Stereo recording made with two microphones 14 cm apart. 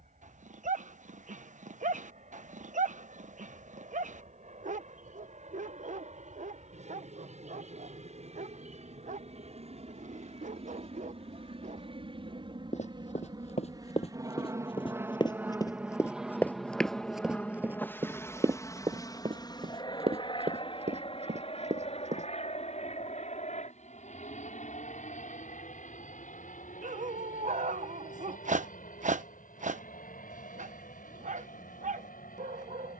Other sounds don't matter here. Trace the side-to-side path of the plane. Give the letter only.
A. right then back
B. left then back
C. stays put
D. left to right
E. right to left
E.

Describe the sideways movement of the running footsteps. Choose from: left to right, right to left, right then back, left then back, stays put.
left to right.